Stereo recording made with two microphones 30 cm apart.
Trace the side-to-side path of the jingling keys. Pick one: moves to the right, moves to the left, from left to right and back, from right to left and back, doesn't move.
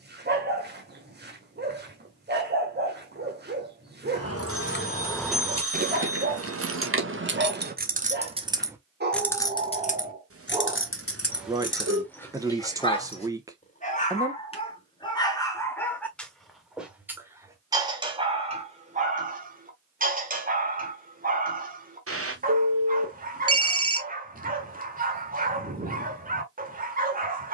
from left to right and back.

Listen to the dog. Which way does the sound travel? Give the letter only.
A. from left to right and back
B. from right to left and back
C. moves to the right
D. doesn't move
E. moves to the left
B.